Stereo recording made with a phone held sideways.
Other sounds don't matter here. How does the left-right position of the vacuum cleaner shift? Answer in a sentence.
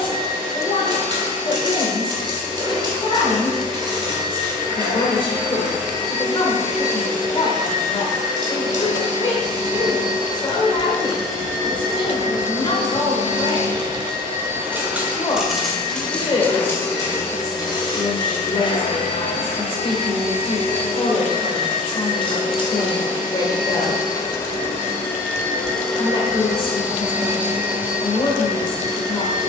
You can hear the vacuum cleaner go left and come back.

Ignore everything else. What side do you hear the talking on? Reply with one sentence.
You can hear the talking on the left.